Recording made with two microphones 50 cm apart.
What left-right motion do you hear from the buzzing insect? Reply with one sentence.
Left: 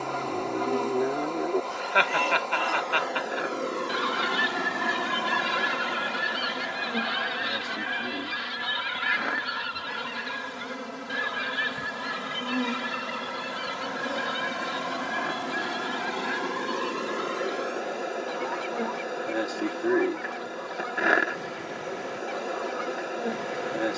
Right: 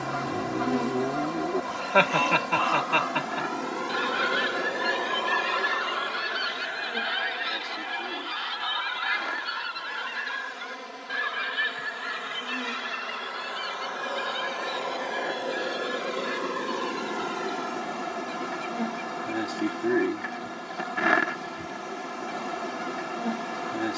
You can hear the buzzing insect go left and come back.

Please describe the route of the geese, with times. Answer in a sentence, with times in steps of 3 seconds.
In this clip you hear the geese on the right from 0 s, in the centre from 3 s and on the left from 6 s.